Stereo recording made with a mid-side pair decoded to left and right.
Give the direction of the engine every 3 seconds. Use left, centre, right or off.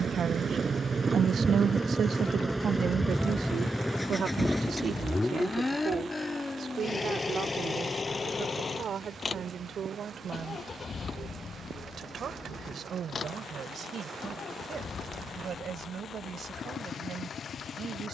right, centre, left, left, left, left.